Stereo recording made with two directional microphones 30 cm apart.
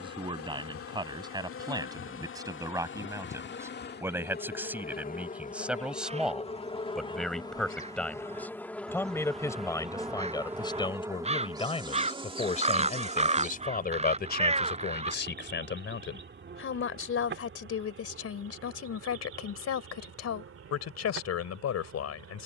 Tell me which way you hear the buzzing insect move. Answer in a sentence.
You can hear the buzzing insect move from left to right.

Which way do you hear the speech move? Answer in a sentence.
In this clip you hear the speech go from the right side to the left.